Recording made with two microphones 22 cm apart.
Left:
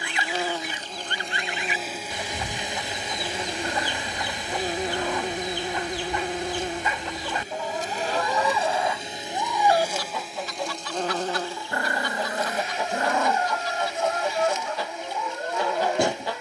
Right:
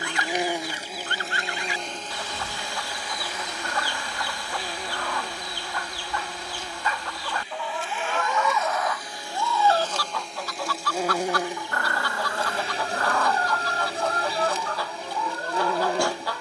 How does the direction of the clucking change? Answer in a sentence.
In this clip you hear the clucking stay in one place.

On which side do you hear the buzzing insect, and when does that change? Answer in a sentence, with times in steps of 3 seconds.
You can hear the buzzing insect in the centre from 0 s, on the left from 3 s, in the centre from 9 s and on the right from 12 s.